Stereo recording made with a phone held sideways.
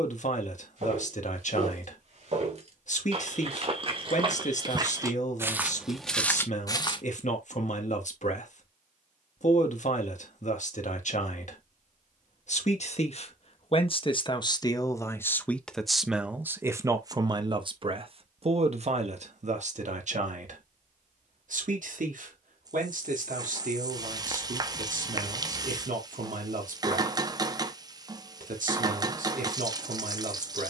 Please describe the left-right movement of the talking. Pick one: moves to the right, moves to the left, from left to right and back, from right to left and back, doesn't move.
moves to the right.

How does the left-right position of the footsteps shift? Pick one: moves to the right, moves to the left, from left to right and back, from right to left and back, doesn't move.
moves to the left.